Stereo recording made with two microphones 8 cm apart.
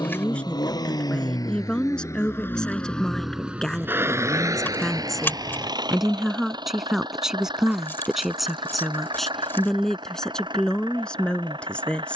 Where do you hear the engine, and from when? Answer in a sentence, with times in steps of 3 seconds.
In this clip you hear the engine on the left from 0 s and on the right from 3 s.